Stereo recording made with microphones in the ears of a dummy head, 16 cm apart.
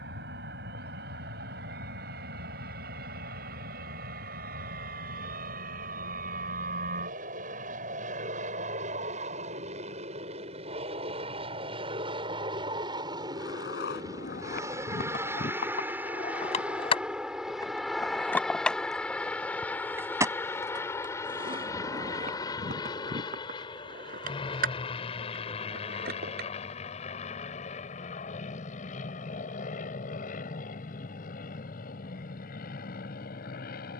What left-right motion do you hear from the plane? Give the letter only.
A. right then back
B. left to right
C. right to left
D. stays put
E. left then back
C.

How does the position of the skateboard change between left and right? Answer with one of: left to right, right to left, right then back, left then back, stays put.
left to right.